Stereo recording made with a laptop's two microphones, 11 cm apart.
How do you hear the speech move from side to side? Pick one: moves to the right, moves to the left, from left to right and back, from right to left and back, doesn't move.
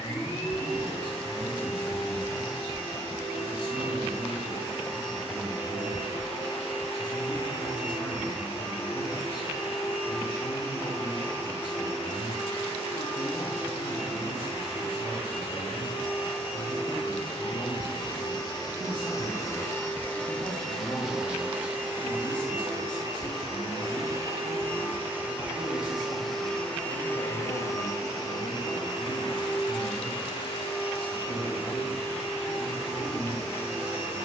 doesn't move.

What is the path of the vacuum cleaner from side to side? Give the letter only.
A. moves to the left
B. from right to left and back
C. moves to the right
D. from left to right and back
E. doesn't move
D.